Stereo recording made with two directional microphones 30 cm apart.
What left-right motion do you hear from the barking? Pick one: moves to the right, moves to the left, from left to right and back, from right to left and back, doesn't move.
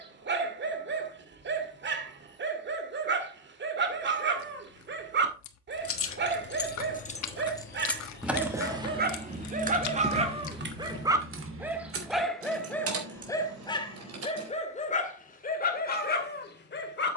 moves to the left.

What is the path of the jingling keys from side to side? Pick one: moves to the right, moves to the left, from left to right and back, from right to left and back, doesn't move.
moves to the right.